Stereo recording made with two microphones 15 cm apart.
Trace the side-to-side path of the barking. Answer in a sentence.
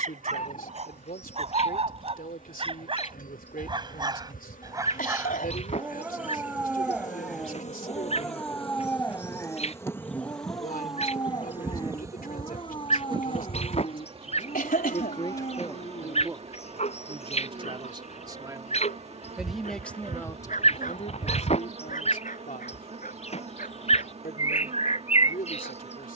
In this clip you hear the barking travel towards the left.